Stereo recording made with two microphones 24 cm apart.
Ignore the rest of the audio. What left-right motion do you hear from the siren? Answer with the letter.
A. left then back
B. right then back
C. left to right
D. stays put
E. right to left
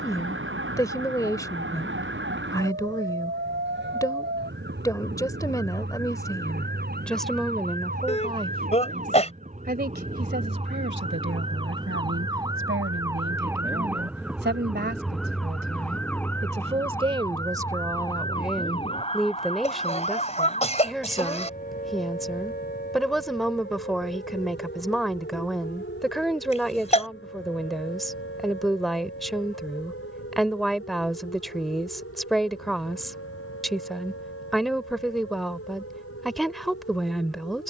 E.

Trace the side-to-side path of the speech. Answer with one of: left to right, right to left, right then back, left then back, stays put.
right then back.